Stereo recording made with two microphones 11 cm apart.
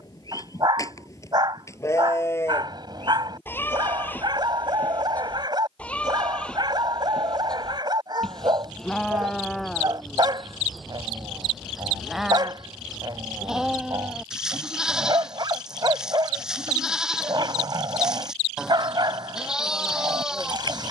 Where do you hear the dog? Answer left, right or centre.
right.